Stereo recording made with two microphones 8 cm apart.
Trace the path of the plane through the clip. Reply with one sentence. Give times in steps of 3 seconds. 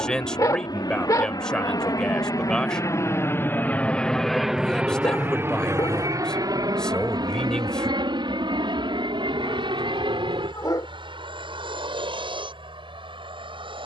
You can hear the plane on the left from 0 s, in the centre from 3 s and on the right from 6 s.